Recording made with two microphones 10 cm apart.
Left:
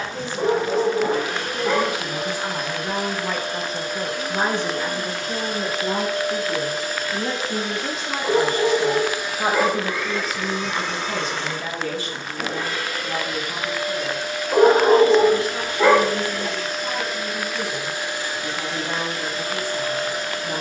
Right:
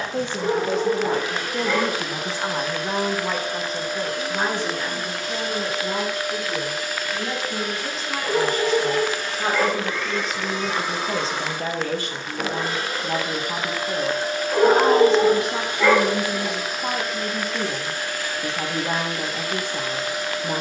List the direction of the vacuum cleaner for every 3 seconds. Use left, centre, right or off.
left, left, left, centre, right, centre, left.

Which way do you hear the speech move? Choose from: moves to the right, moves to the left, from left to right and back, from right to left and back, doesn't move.
from right to left and back.